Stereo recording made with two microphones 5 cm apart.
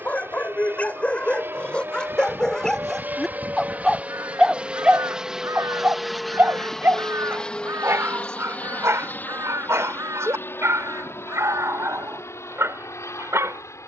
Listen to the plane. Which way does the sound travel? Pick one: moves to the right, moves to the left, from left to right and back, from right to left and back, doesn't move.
moves to the left.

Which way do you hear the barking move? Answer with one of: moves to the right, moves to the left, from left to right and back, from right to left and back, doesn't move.
moves to the right.